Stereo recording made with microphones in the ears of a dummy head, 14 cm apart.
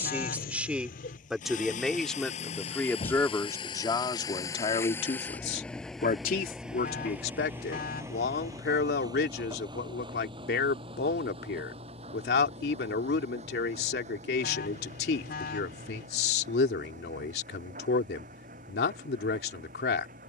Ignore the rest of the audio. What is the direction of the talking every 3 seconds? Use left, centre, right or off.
centre, left, left, left, left, left, left.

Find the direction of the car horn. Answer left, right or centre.
left.